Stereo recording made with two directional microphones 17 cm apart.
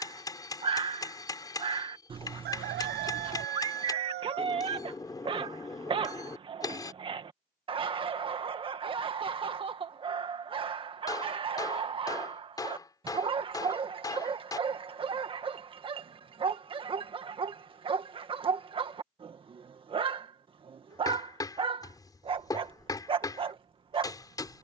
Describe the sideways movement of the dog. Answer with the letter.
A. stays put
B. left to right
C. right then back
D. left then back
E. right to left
A.